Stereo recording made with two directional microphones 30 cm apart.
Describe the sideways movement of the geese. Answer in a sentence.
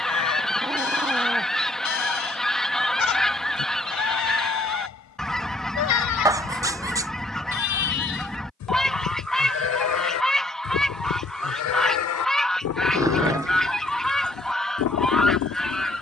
You can hear the geese stay in one place.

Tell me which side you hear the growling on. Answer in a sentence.
In this clip you hear the growling in the centre.